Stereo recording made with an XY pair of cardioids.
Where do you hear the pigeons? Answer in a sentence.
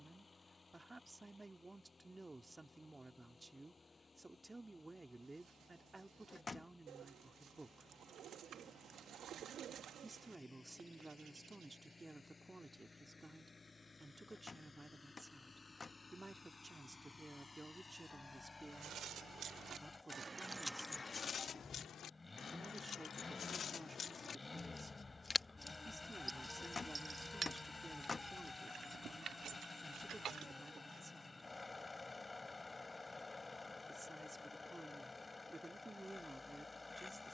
In this clip you hear the pigeons on the right.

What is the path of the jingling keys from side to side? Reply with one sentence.
You can hear the jingling keys move from right to left and back again.